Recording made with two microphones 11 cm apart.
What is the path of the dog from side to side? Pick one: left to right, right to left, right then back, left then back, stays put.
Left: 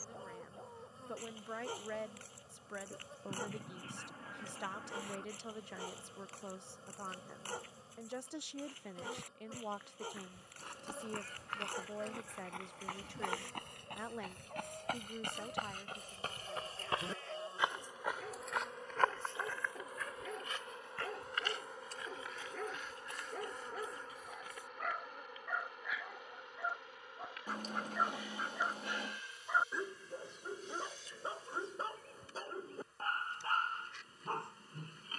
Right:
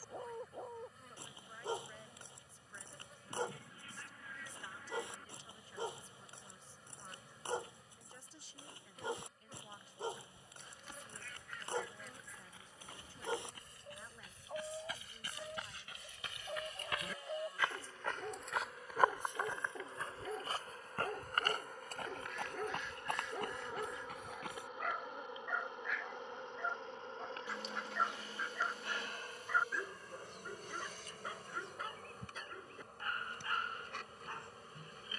right to left.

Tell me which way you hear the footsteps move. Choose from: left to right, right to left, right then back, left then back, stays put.
left to right.